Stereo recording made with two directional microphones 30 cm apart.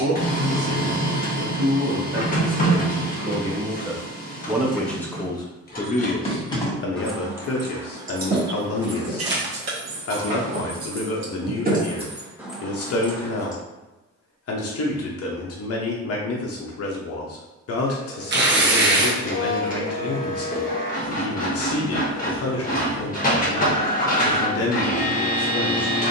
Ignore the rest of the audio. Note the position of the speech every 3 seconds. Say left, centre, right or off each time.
right, centre, left, left, left, left, left, left, left.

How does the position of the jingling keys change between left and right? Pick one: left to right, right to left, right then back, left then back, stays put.
right then back.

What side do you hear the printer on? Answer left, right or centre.
left.